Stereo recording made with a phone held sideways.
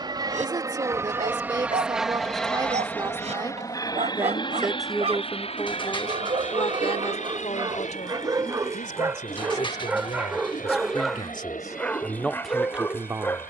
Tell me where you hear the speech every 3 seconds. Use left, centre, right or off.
right, centre, left, left, centre.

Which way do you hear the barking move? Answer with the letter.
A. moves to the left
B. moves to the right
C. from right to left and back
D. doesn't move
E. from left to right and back
A.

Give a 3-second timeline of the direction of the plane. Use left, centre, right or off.
centre, left, left, left, left.